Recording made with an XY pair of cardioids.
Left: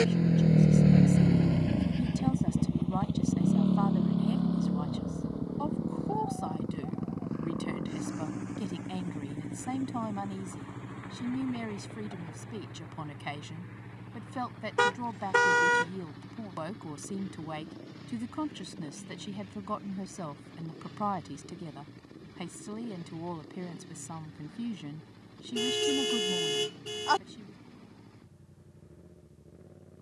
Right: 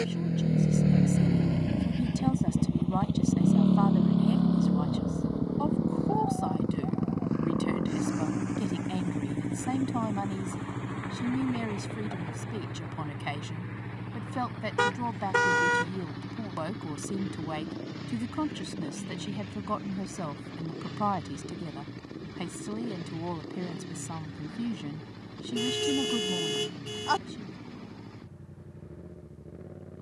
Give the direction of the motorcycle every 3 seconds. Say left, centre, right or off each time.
centre, right, right, right, right, right, right, right, right, right.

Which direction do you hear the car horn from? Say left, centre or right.
centre.